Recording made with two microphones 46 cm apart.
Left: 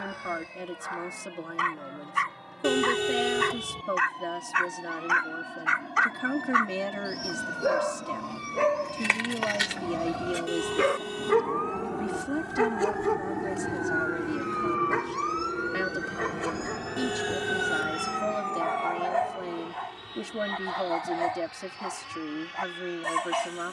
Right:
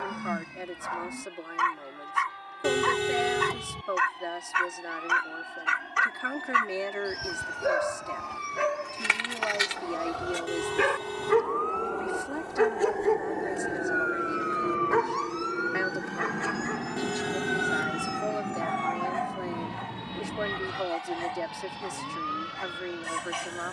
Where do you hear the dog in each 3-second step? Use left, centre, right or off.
right, right, right, centre, left, left, left, left.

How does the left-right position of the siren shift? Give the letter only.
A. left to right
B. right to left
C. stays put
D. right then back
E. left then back
A.